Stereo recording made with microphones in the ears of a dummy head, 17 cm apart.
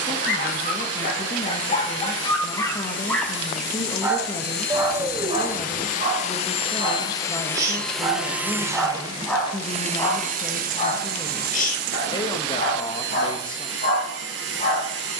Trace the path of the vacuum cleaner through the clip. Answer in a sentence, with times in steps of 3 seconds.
You can hear the vacuum cleaner on the left from 0 s, in the centre from 6 s and on the right from 9 s.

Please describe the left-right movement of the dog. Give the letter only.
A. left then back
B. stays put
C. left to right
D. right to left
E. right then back
E.